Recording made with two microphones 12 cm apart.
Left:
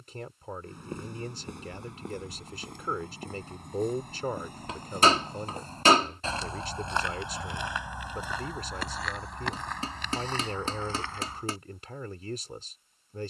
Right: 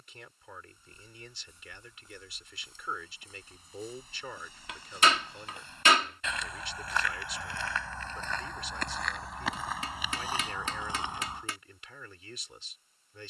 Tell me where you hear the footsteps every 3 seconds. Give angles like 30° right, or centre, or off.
70° left, 50° left, 20° left, 10° right, off.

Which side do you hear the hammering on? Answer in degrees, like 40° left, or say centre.
40° left.